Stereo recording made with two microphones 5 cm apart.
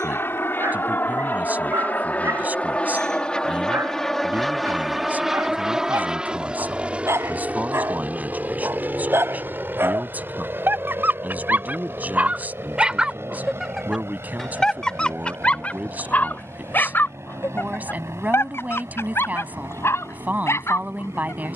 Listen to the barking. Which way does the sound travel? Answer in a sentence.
In this clip you hear the barking move to the left.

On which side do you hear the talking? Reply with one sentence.
You can hear the talking on the right.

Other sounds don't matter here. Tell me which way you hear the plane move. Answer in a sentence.
You can hear the plane move to the right.